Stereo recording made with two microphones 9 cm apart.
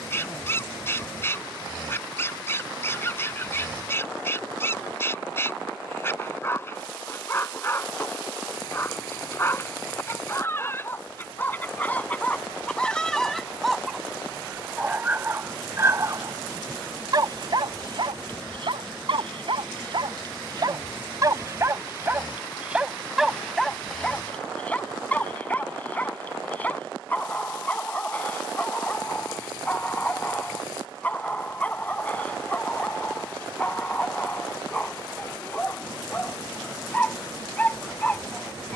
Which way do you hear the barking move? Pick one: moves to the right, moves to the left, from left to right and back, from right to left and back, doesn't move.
from left to right and back.